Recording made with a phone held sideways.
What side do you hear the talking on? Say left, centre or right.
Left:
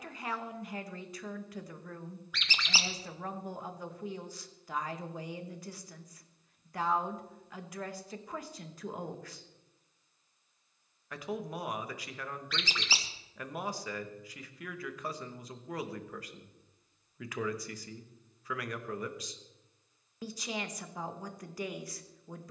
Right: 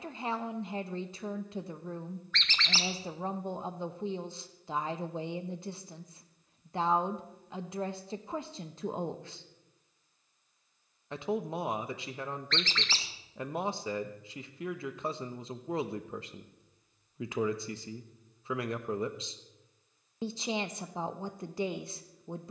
right.